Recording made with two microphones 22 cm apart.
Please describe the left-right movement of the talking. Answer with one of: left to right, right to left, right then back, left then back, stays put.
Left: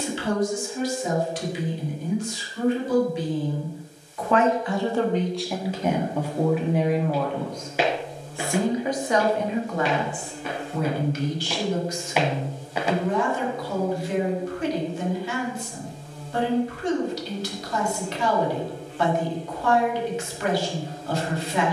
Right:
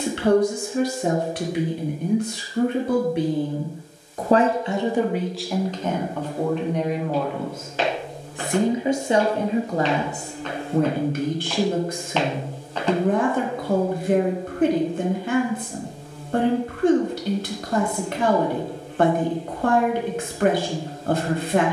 left then back.